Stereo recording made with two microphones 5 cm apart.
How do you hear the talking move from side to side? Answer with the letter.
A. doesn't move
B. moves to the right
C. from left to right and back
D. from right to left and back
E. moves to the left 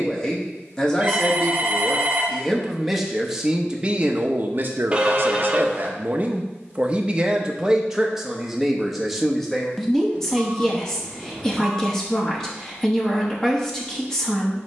C.